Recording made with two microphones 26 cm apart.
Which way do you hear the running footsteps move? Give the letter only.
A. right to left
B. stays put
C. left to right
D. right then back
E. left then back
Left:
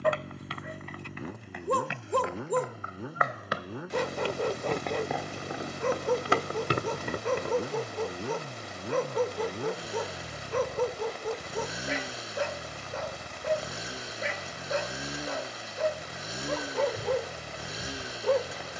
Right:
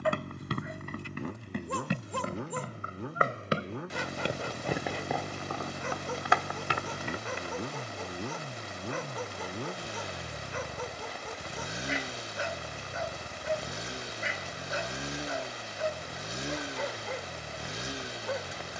A.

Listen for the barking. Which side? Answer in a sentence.
You can hear the barking on the left.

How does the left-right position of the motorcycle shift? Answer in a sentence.
In this clip you hear the motorcycle stay in one place.